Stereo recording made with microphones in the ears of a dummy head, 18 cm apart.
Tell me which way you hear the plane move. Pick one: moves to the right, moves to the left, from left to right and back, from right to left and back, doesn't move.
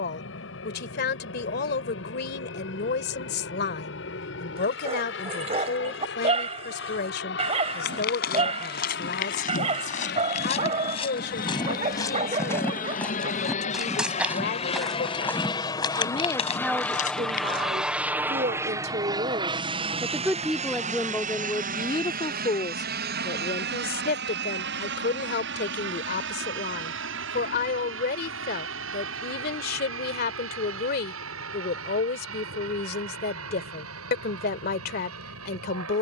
moves to the right.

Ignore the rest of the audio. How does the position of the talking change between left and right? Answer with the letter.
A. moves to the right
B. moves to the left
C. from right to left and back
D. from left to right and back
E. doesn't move
D.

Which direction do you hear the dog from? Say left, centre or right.
right.